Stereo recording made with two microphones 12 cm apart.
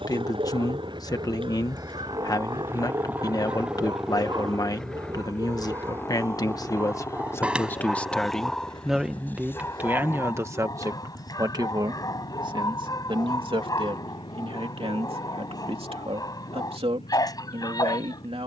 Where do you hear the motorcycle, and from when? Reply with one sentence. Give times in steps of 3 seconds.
In this clip you hear the motorcycle on the right from 0 s, in the centre from 3 s and on the left from 6 s.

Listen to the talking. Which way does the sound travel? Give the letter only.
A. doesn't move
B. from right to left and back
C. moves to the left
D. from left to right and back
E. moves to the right
E.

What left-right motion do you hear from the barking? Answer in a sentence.
In this clip you hear the barking go from the right side to the left.